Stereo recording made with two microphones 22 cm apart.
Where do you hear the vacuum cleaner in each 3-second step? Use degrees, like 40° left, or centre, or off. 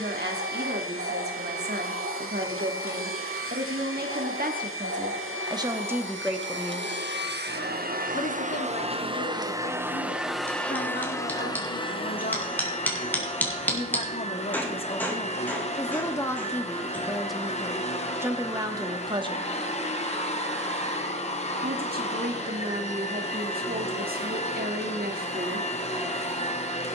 70° right, 70° right, 50° right, centre, 30° left, 30° left, 30° left, 30° left, 30° left.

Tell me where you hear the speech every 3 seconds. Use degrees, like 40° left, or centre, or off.
50° right, 40° right, 20° left, 50° left, 30° left, 10° left, 20° right, 40° right, 40° right.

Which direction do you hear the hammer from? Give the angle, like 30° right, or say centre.
10° left.